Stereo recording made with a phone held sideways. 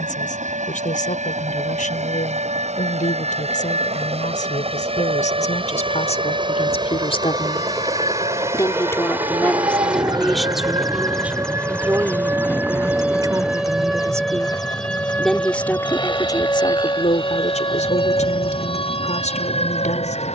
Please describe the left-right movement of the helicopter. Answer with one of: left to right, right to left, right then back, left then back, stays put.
right to left.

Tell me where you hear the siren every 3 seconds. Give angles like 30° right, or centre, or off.
60° right, 50° right, 40° right, 30° right, 10° right, 20° left, 40° left.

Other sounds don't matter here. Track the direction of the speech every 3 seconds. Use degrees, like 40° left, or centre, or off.
60° left, 60° left, 40° left, centre, 20° right, 30° left, 60° left.